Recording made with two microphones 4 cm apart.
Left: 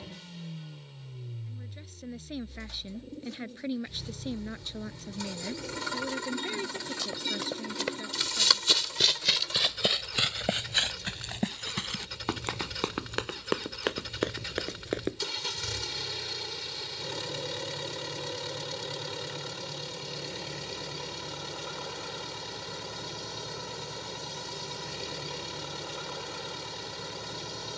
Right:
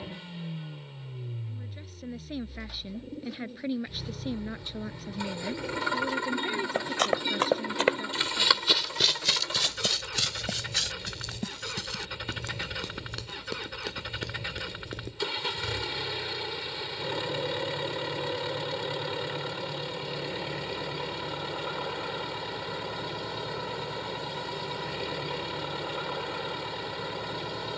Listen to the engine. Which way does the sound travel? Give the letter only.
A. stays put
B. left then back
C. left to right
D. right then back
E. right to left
A.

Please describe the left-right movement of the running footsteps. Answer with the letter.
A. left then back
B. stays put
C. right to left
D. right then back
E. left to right
C.